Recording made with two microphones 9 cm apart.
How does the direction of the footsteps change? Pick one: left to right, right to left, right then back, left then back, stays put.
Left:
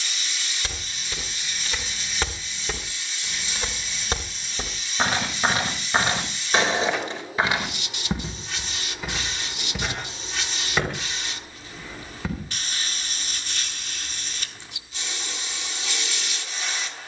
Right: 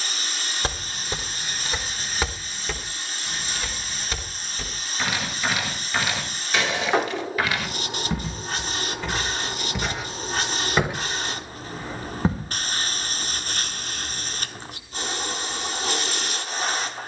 left then back.